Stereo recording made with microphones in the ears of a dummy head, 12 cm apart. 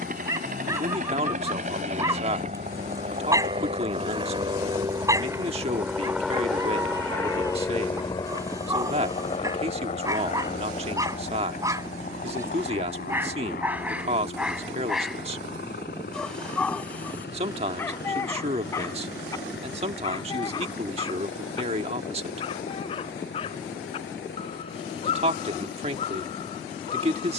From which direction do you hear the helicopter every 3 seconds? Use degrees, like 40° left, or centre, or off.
60° right, 30° right, 20° left, 50° left, 60° left, 70° left, 70° left, 80° left, 80° left.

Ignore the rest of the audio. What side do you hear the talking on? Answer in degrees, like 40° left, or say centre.
40° right.